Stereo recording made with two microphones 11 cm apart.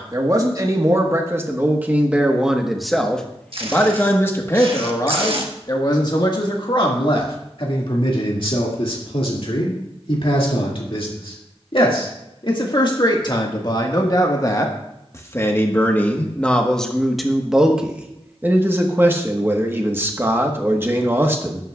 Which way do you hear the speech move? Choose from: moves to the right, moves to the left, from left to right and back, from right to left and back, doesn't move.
from right to left and back.